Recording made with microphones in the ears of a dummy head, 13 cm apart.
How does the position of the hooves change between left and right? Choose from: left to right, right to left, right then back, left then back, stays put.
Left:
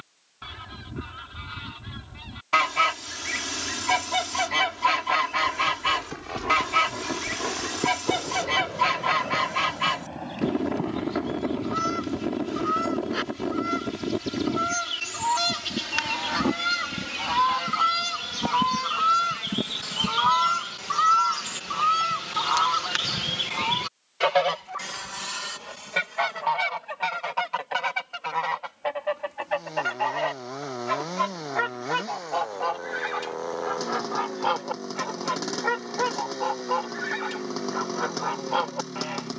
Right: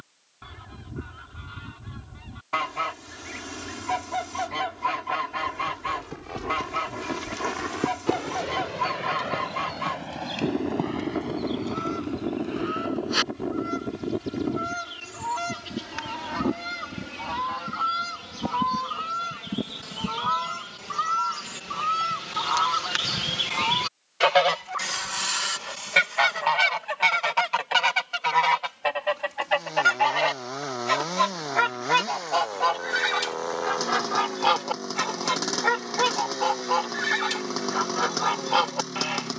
left to right.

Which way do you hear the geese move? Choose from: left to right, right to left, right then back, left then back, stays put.
left to right.